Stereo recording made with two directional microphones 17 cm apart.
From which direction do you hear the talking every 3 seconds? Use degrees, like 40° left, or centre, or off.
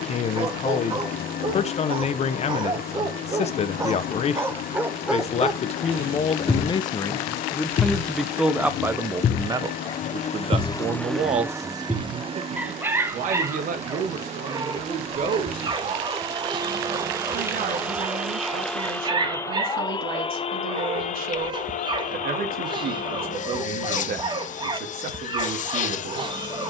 40° left, 40° left, 10° left, 30° right, 50° right, 60° right, 60° right, 60° right, 60° right.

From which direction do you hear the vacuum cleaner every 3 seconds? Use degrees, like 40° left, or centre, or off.
60° left, 60° left, 60° left, 30° left, 40° right, 20° right, 20° left, 50° left, 50° left.